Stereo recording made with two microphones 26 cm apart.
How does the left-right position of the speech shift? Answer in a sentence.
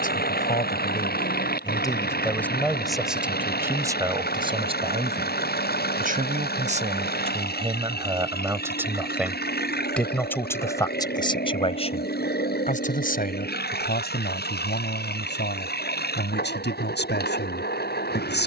In this clip you hear the speech go right and come back.